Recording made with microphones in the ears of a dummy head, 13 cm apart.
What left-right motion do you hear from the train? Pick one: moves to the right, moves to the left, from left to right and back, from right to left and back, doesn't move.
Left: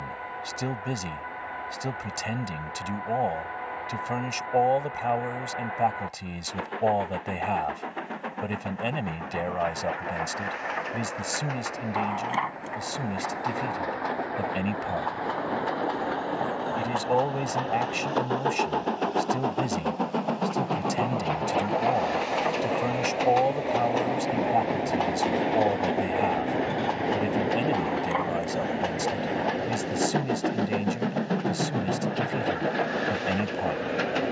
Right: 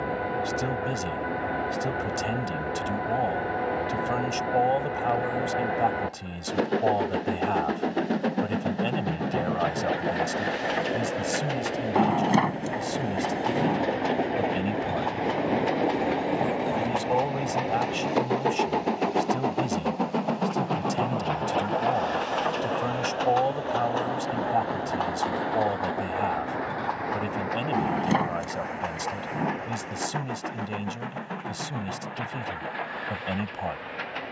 moves to the left.